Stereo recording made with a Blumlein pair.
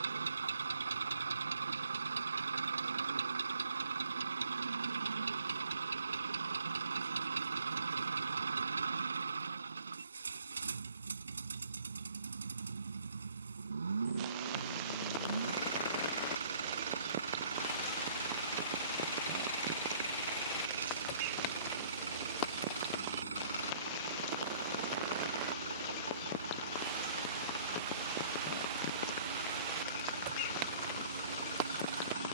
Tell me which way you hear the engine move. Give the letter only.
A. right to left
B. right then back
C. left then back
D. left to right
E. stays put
E.